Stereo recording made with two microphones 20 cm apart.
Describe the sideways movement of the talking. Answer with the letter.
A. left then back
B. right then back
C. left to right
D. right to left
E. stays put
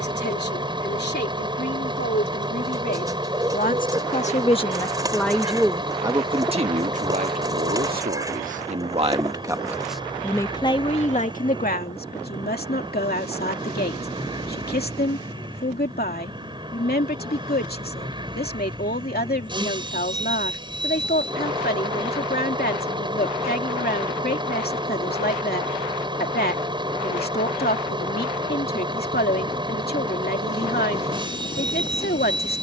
B.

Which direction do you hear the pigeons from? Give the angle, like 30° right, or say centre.
20° right.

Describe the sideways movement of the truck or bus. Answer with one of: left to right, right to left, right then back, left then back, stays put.
stays put.